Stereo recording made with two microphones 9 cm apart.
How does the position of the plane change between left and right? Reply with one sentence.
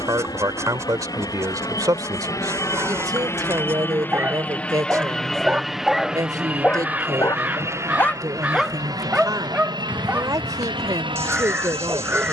In this clip you hear the plane go from the left side to the right.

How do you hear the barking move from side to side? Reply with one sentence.
You can hear the barking go left and come back.